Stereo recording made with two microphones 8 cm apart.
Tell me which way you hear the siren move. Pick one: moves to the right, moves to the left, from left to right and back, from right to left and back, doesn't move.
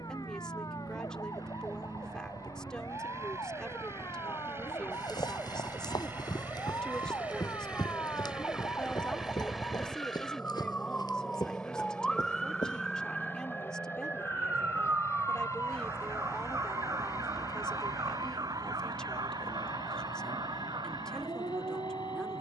moves to the right.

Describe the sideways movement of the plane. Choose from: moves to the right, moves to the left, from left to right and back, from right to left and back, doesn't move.
moves to the left.